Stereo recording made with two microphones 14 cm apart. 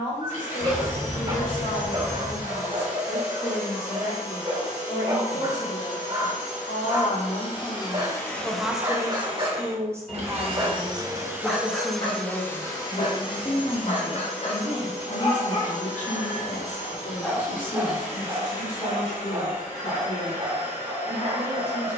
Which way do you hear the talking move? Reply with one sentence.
You can hear the talking move from left to right and back again.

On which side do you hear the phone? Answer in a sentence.
You can hear the phone in the centre.